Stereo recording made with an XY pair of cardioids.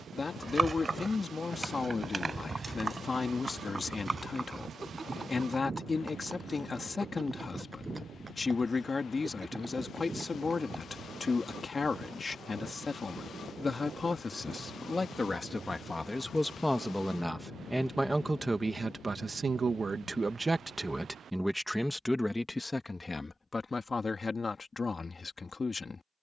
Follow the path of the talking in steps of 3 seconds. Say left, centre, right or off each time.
left, left, left, left, left, centre, right, centre, left.